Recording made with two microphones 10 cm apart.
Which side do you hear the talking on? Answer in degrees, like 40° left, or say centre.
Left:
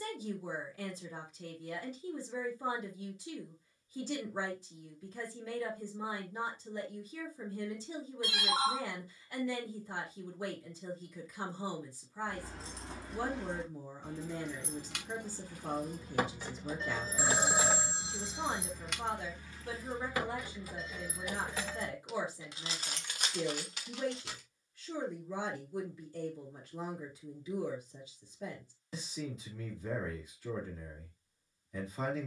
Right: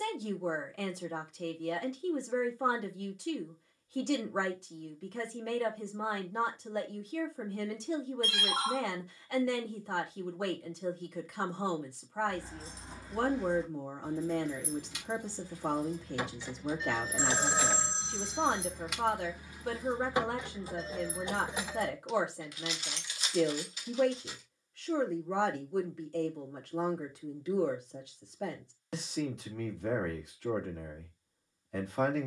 70° right.